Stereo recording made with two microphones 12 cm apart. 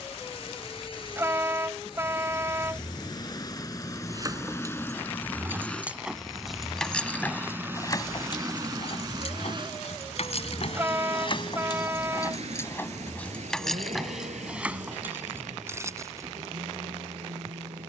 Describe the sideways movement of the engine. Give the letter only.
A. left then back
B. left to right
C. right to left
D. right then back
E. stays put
B.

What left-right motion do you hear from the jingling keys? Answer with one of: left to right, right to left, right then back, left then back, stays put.
left then back.